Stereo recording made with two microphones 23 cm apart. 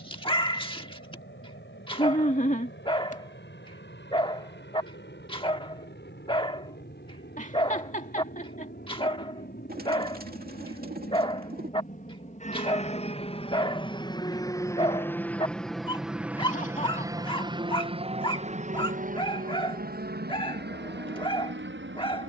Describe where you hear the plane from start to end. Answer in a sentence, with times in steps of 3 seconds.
In this clip you hear the plane on the left from 0 s, in the centre from 15 s and on the right from 18 s.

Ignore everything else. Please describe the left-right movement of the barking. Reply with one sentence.
You can hear the barking stay put.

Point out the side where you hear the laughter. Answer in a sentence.
You can hear the laughter on the left.